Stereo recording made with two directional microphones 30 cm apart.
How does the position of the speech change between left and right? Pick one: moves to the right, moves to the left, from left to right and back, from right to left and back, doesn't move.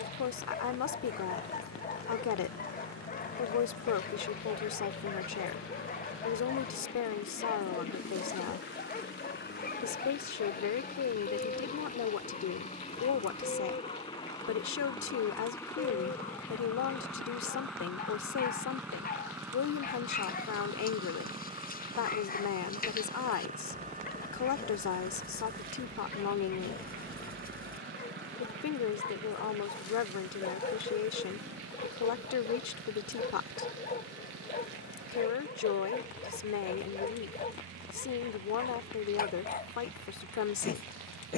doesn't move.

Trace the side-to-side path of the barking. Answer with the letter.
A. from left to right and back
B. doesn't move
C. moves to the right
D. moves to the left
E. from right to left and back
B.